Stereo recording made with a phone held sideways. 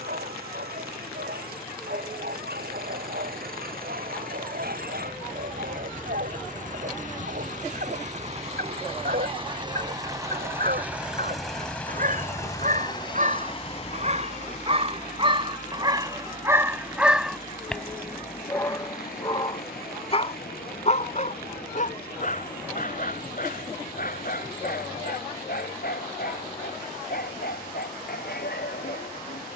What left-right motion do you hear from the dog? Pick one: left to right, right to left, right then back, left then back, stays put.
right to left.